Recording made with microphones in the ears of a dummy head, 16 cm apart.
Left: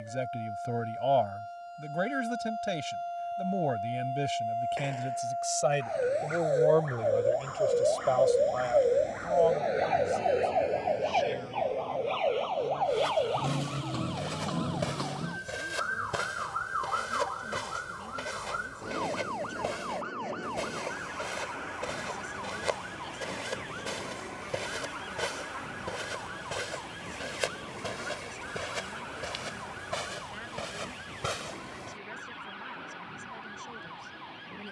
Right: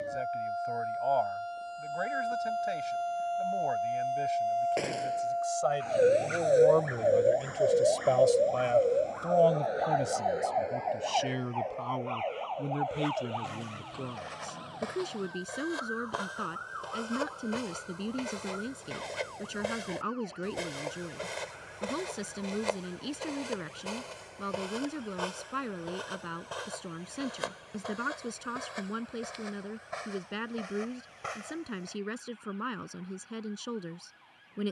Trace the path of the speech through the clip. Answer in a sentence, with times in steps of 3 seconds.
You can hear the speech on the left from 0 s, in the centre from 6 s and on the right from 9 s.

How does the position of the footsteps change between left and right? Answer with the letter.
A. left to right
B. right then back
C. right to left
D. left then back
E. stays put
B.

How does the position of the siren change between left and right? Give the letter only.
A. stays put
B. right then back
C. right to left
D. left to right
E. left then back
C.